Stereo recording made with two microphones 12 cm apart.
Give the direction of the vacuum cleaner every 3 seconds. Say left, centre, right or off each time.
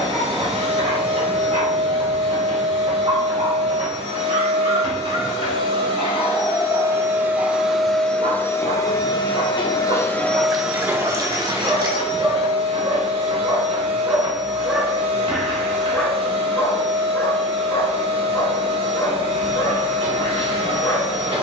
right, right, centre, centre, right, right, right.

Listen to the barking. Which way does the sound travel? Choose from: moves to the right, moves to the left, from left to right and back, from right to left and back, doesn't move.
moves to the left.